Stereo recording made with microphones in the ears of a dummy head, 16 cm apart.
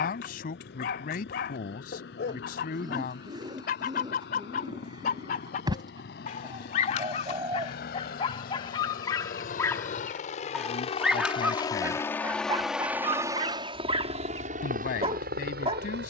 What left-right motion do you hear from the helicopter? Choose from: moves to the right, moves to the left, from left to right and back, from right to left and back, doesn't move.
moves to the right.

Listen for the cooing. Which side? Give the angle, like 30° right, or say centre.
20° right.